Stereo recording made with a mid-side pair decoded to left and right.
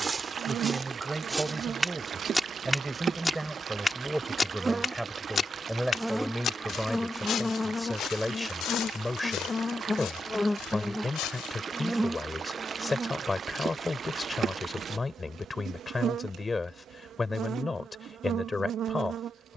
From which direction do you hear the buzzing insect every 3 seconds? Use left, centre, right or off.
right, right, centre, centre, right, right, right.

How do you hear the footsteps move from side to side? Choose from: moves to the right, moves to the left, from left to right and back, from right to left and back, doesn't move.
moves to the left.